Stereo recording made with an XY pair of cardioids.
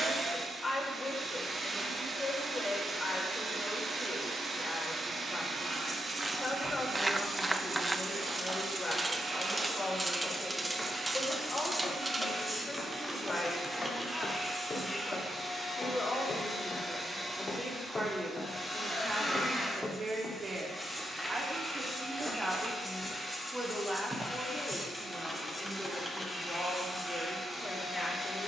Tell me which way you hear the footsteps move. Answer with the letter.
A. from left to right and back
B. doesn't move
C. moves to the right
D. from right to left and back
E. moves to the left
D.